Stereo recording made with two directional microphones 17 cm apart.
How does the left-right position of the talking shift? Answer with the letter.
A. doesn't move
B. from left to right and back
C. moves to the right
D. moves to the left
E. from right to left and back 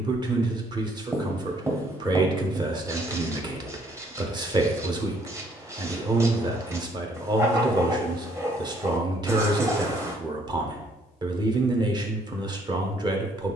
A.